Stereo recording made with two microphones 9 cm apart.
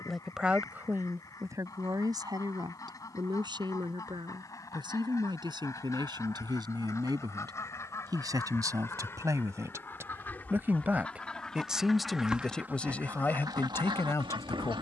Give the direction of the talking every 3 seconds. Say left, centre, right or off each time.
right, right, right, right, left.